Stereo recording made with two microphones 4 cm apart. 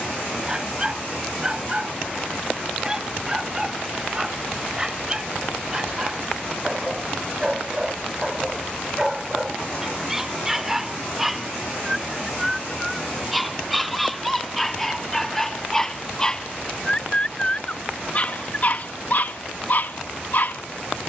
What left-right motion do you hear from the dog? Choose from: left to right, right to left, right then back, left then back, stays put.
right to left.